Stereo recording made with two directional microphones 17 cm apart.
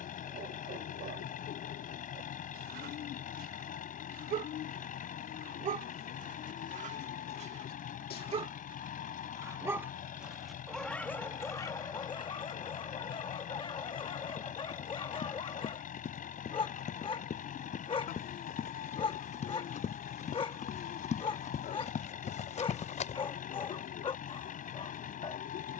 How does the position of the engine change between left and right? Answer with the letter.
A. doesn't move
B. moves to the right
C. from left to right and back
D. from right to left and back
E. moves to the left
A.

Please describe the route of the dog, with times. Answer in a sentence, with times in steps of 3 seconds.
In this clip you hear the dog on the right from 0 s, in the centre from 9 s and on the left from 12 s.